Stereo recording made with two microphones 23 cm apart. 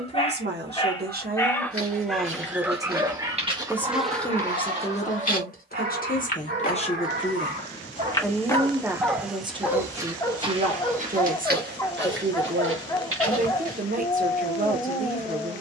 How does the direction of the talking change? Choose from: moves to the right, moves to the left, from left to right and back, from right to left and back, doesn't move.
from right to left and back.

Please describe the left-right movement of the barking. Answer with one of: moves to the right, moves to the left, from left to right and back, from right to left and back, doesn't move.
from left to right and back.